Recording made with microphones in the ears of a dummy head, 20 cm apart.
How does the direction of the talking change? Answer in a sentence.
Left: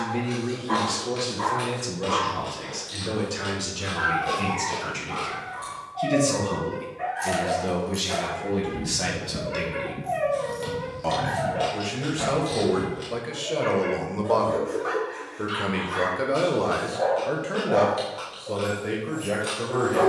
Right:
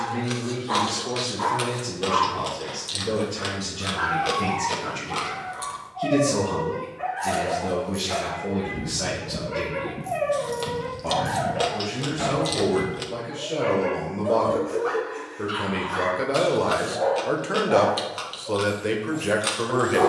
In this clip you hear the talking move from left to right.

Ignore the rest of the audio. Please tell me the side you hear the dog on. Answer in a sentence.
You can hear the dog in the centre.